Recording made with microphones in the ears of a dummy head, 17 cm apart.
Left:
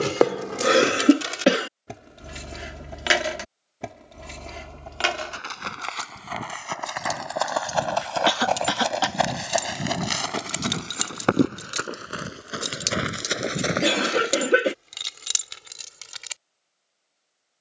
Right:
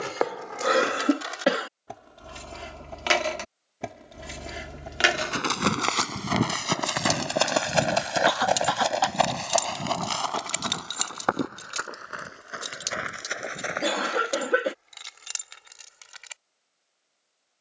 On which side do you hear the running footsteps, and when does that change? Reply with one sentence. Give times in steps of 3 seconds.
You can hear the running footsteps not at all from 0 s, on the right from 3 s, on the left from 9 s and not at all from 15 s.